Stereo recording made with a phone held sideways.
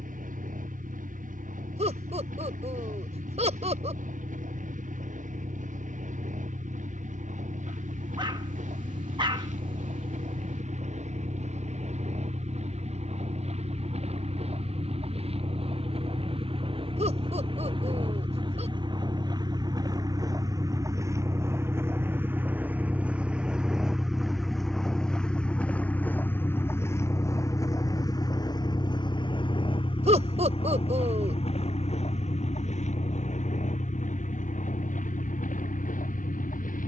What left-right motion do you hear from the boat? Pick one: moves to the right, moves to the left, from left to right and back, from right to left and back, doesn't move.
moves to the left.